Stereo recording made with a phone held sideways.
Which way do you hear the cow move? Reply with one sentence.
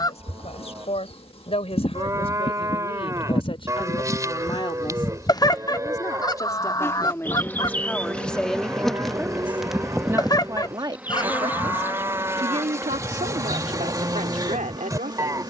You can hear the cow stay in one place.